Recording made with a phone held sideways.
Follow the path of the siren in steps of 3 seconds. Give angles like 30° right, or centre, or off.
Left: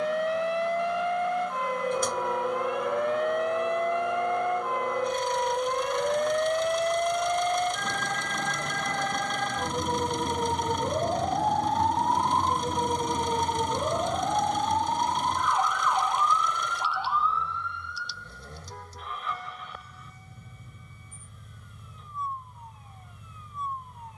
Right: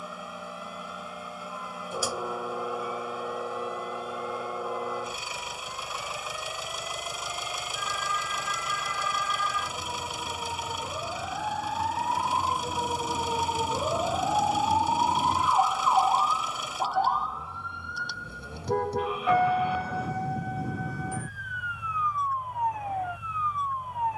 70° left, 60° left, 60° left, 40° left, 10° left, 30° right, 60° right, 70° right.